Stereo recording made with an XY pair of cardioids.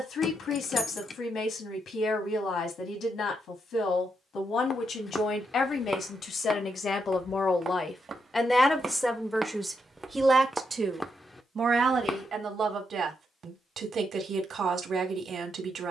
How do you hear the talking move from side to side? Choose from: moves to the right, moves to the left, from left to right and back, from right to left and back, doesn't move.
moves to the right.